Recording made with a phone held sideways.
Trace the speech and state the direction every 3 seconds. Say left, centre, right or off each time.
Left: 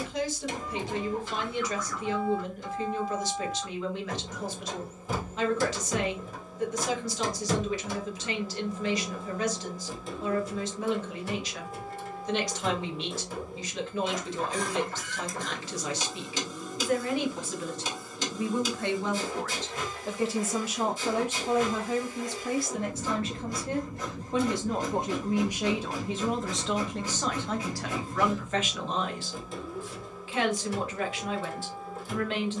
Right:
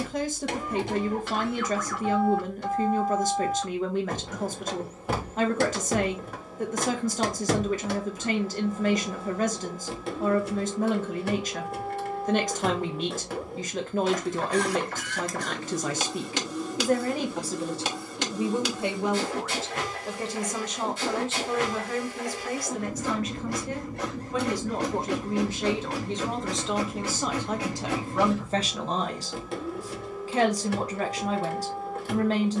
right, right, right, right, right, right, centre, left, centre, right, right.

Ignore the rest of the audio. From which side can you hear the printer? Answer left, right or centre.
right.